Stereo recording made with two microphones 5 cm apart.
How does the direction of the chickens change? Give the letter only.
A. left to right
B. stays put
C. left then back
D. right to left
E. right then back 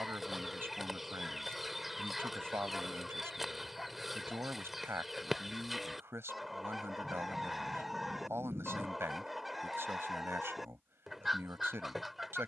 B.